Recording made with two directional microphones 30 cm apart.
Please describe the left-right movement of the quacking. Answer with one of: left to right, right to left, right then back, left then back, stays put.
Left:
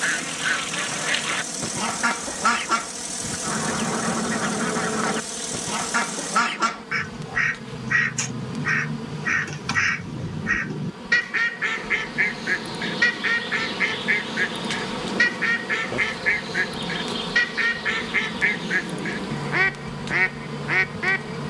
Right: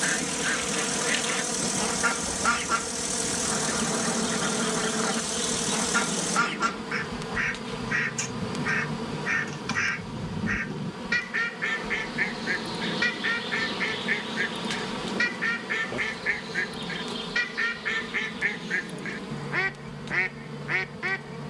stays put.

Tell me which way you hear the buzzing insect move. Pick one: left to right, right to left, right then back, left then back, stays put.
right to left.